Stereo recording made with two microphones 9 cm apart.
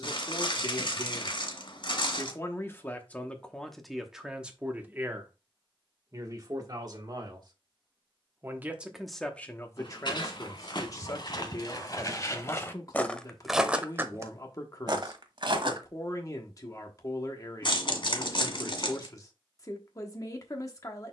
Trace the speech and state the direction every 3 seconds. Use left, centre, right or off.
left, centre, right, left, left, left, left.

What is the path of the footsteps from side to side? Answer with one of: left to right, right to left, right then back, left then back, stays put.
left to right.